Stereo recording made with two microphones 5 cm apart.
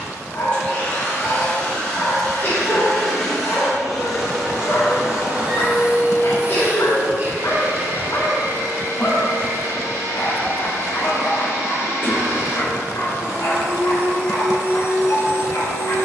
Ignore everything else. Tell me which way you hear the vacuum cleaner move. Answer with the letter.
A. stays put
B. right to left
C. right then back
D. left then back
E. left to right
E.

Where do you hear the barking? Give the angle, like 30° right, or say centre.
60° left.